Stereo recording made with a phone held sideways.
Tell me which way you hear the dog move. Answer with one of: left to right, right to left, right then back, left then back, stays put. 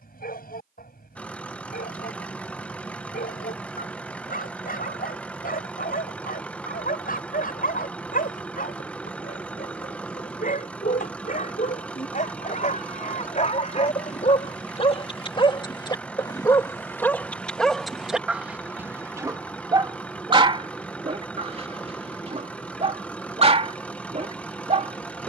left to right.